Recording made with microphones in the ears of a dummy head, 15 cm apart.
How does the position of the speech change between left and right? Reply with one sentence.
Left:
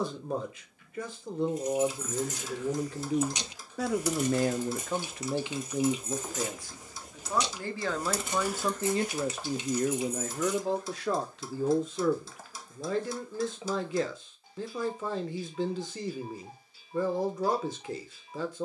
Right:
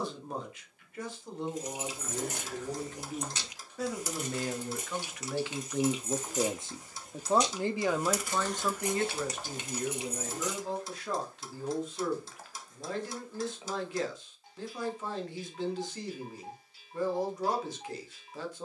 You can hear the speech go right and come back.